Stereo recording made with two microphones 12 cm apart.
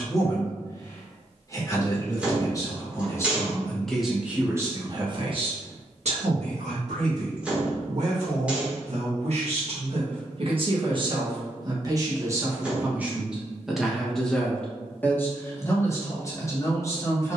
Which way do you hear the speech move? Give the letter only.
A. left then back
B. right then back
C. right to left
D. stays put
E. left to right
B.